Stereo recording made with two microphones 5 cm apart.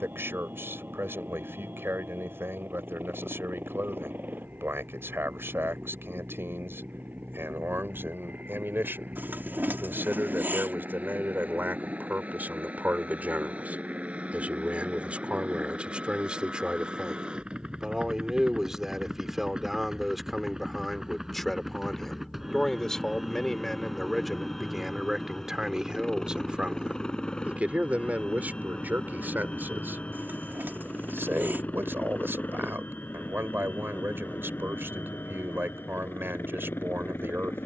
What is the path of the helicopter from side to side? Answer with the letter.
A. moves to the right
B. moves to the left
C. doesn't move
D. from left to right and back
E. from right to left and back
B.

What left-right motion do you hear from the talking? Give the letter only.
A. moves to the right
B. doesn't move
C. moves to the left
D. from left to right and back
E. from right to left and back
E.